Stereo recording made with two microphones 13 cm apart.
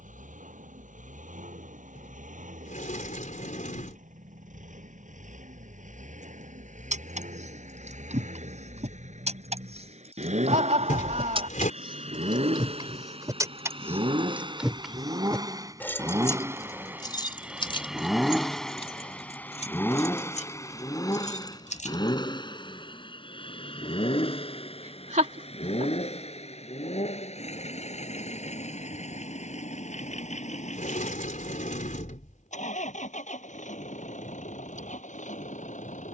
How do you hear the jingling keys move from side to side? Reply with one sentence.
In this clip you hear the jingling keys move from right to left.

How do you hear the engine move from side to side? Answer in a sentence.
In this clip you hear the engine move to the left.